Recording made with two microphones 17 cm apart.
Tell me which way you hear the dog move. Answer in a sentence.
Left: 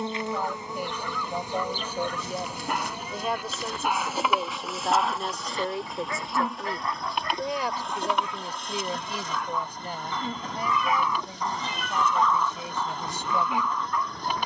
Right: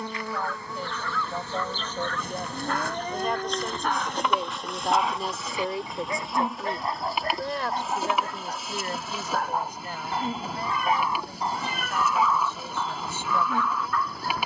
In this clip you hear the dog move from left to right and back again.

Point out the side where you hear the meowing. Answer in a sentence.
You can hear the meowing on the right.